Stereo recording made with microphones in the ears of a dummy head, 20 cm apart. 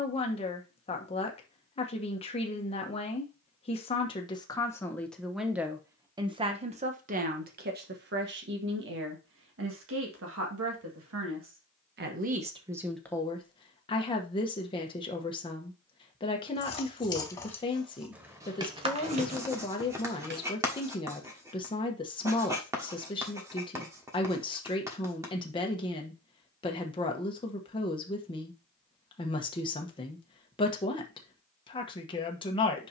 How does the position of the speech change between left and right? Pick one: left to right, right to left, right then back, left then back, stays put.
right then back.